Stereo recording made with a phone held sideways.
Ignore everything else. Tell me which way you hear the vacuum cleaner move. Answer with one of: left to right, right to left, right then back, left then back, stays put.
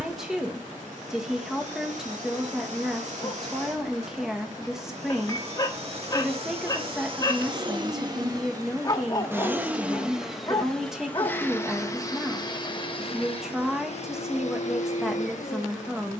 right to left.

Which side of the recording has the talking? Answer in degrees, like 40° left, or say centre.
centre.